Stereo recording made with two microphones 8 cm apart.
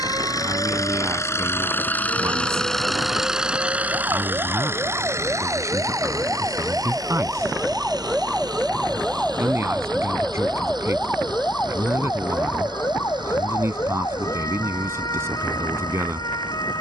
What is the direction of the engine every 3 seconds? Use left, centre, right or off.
left, right, right, right, right, right.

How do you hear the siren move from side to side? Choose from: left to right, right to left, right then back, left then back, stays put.
right to left.